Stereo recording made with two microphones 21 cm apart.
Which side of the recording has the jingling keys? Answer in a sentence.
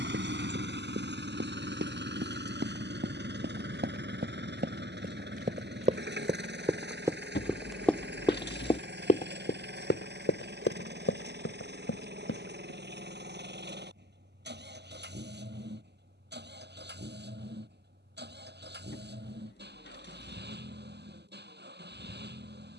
You can hear the jingling keys on the left.